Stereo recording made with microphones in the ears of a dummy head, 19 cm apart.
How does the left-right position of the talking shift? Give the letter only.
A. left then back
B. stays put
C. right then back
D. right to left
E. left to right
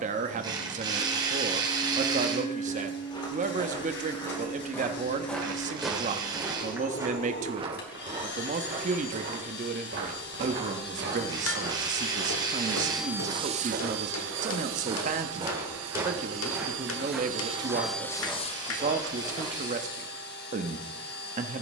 B.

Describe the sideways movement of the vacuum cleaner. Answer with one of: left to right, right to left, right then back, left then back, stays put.
right then back.